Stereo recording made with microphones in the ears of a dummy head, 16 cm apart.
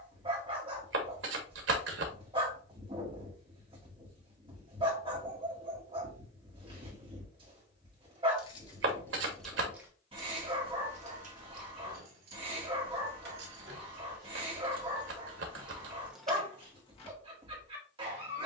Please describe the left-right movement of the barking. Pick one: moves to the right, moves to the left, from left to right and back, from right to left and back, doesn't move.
doesn't move.